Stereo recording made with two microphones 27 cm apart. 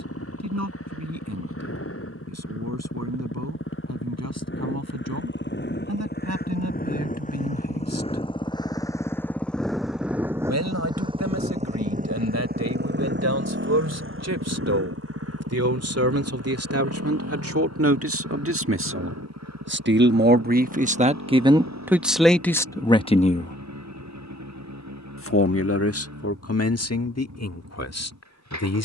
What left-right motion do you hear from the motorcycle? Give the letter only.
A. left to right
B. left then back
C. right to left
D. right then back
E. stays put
A.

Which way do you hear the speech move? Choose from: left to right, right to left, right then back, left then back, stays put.
right to left.